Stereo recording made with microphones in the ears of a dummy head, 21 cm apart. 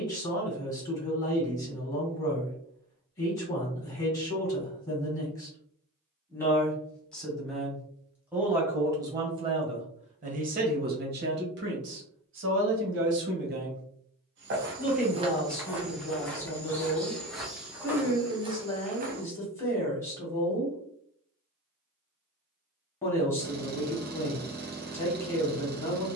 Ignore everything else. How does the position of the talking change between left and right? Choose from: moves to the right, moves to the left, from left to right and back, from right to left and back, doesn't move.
from left to right and back.